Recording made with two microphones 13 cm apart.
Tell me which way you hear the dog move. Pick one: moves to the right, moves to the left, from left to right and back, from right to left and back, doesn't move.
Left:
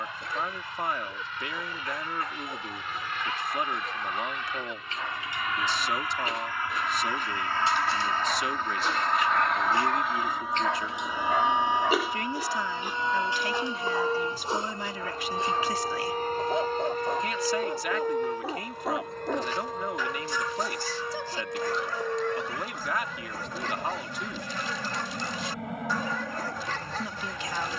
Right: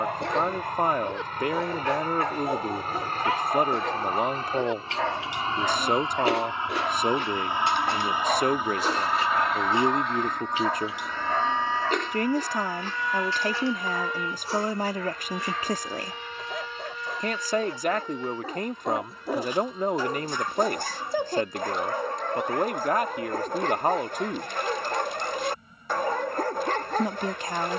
from right to left and back.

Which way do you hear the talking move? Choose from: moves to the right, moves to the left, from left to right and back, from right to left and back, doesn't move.
doesn't move.